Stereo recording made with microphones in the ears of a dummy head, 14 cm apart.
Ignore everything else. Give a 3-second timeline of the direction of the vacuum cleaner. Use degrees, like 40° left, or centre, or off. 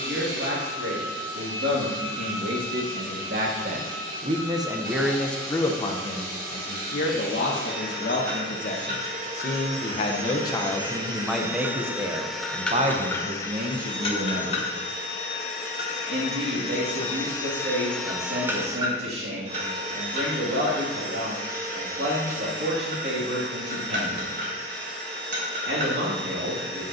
60° right, 60° right, 60° right, 30° right, 20° left, 40° left, 40° right, 60° right, 60° right.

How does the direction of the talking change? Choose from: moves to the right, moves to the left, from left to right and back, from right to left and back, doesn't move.
from right to left and back.